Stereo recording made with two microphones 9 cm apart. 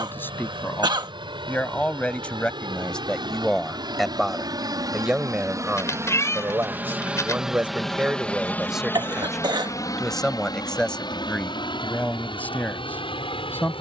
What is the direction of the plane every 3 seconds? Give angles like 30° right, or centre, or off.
70° right, 50° right, centre, 40° left, 60° left.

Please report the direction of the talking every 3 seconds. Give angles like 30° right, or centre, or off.
20° left, centre, 10° right, 10° left, 20° left.